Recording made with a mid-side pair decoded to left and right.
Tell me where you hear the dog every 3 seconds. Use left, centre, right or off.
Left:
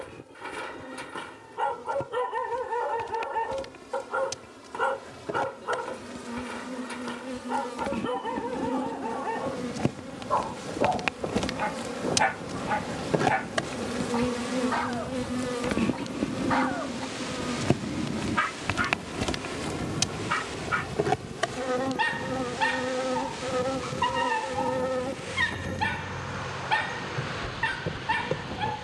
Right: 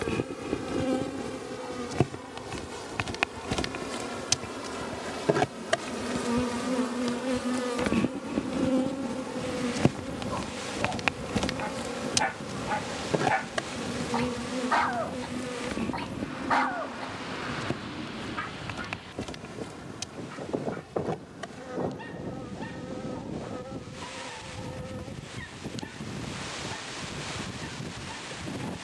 left, left, left, left, centre, centre, left, left, left, left.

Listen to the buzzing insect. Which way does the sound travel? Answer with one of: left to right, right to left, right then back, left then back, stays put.
right to left.